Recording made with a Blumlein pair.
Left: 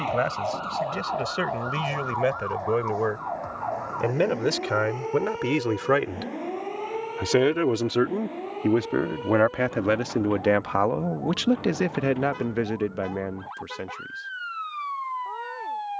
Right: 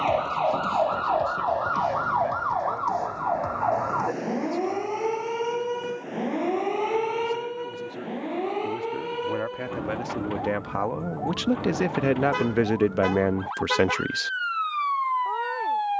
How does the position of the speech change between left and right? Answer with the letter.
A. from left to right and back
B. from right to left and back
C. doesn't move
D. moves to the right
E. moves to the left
D.